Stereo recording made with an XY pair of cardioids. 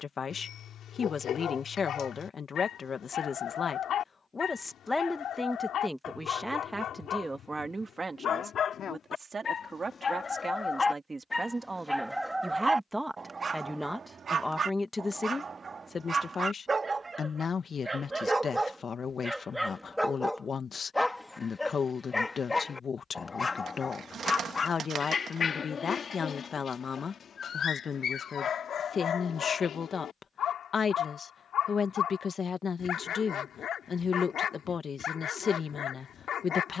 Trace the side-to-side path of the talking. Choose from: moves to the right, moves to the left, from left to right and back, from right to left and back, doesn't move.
from left to right and back.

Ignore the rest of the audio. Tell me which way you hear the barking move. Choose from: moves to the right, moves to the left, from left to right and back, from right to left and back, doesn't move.
from left to right and back.